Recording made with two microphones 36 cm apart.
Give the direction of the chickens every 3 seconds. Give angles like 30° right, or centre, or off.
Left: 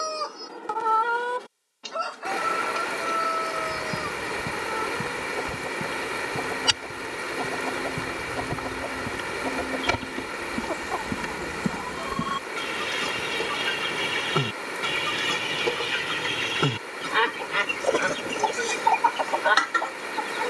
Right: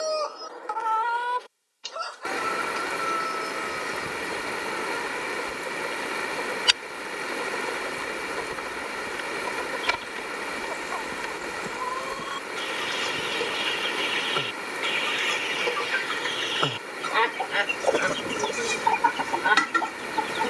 60° left, 80° left, 80° left, 70° left, 60° left, 30° left, 30° right.